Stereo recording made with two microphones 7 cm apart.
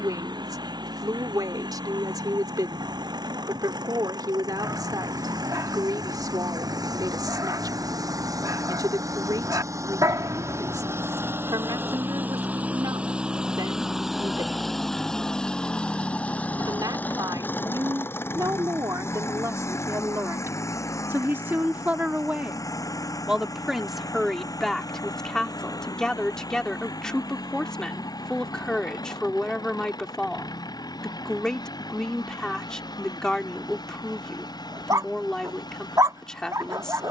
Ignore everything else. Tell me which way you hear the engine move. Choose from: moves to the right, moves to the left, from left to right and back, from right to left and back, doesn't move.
moves to the left.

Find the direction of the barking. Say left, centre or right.
right.